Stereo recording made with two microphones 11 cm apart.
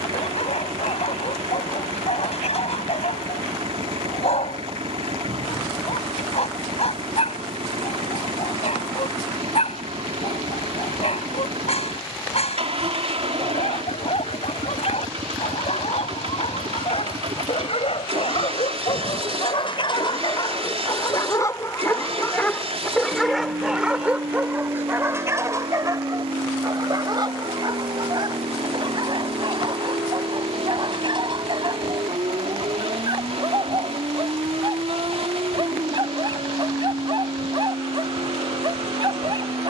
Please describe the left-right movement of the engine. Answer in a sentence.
You can hear the engine stay in one place.